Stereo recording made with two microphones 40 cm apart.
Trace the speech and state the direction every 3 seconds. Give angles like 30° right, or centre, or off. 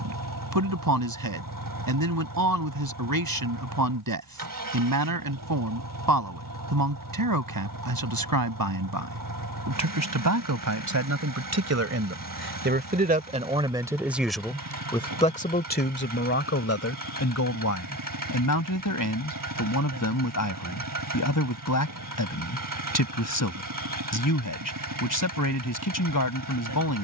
60° right, 60° right, 60° right, 50° right, 10° right, 30° left, 50° left, 50° left, 50° left.